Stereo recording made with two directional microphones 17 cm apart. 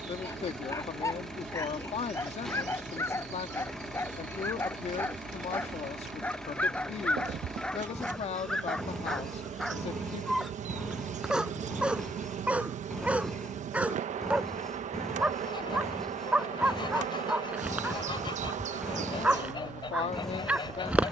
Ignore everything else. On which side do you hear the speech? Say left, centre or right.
left.